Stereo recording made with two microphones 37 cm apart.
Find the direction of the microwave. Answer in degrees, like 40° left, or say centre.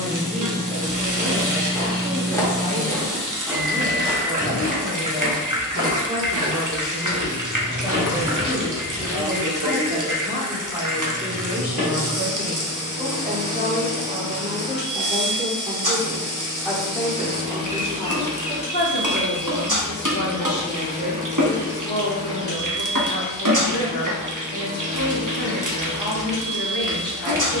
70° right.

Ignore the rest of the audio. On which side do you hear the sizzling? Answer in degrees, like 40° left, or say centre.
60° right.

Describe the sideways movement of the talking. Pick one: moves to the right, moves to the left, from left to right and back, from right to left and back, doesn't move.
moves to the left.